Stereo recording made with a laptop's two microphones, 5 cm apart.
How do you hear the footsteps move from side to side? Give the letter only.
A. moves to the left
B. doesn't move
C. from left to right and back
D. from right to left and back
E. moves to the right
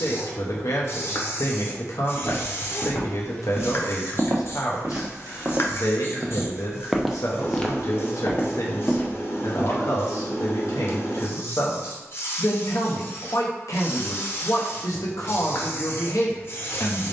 C.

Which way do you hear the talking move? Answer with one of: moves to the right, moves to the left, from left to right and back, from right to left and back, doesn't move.
doesn't move.